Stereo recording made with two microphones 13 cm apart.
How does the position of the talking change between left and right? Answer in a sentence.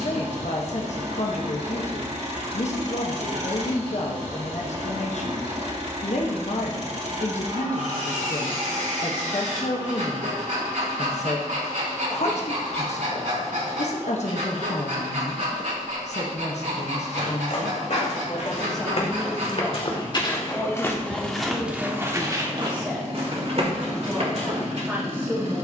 In this clip you hear the talking travel towards the right.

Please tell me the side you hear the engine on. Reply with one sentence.
In this clip you hear the engine on the right.